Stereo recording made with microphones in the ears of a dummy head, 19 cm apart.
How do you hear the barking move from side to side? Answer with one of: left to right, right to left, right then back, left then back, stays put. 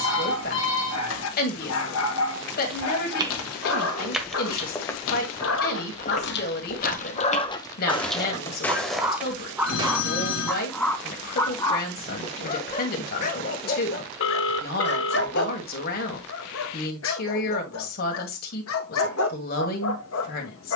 right then back.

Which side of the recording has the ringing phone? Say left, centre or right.
left.